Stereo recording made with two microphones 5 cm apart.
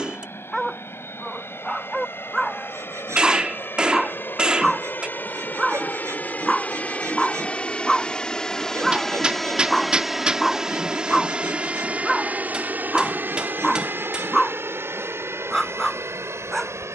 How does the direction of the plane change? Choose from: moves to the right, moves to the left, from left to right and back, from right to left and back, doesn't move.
moves to the right.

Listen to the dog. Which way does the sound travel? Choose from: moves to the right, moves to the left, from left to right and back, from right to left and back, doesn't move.
doesn't move.